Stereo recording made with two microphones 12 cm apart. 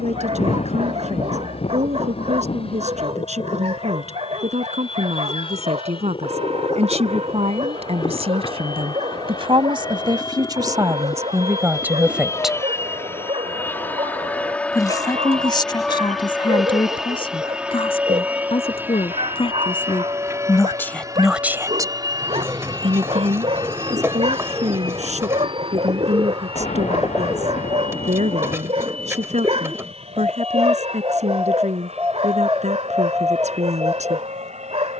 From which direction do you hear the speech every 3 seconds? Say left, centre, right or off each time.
right, right, right, right, centre, left, left, right, right, right, right, right.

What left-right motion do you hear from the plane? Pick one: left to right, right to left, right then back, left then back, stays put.
left to right.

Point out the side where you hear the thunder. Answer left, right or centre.
left.